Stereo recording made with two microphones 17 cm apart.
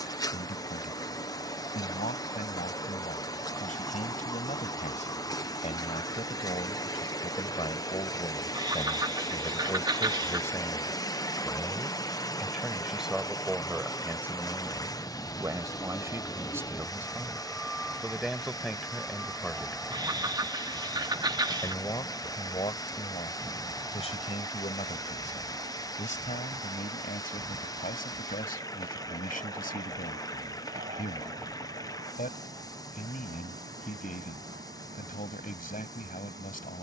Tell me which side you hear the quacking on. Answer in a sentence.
You can hear the quacking on the right.